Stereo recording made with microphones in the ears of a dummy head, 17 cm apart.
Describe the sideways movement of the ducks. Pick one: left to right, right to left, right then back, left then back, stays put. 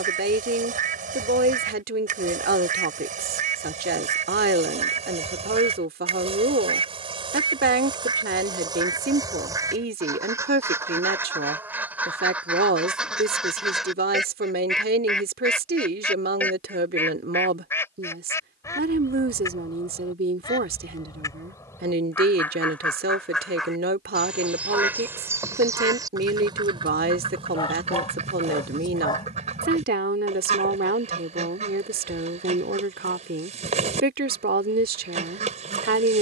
left then back.